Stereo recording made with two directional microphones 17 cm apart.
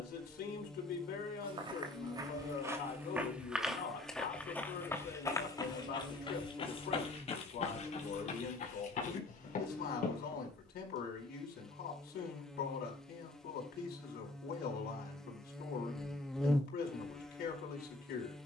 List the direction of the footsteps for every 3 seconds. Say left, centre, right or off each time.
right, centre, left, left, off, off.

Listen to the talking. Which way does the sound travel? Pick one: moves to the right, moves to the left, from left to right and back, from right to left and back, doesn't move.
doesn't move.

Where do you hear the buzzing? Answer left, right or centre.
centre.